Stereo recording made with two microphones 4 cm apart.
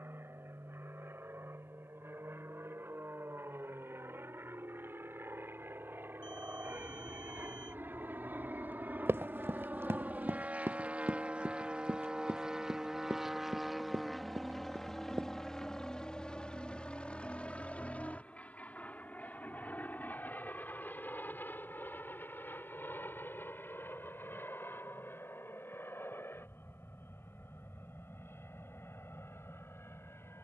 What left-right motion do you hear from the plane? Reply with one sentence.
In this clip you hear the plane move from right to left.